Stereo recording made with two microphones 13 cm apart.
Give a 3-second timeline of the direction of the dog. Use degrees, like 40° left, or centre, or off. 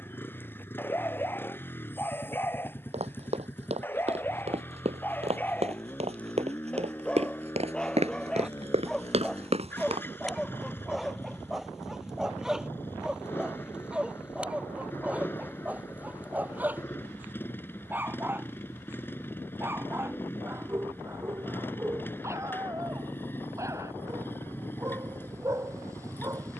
20° left, 20° left, 10° left, centre, 10° right, 10° right, 20° right, 20° right, 20° right.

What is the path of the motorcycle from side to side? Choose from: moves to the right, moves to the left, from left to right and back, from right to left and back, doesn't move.
doesn't move.